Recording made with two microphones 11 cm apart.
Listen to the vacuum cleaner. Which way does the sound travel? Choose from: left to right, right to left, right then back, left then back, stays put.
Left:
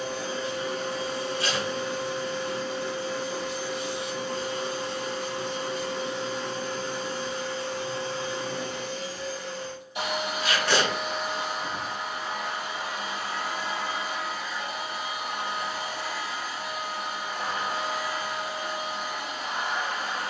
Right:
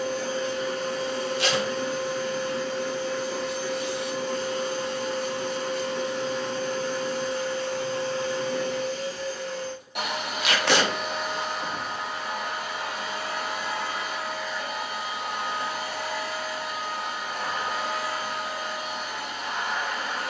stays put.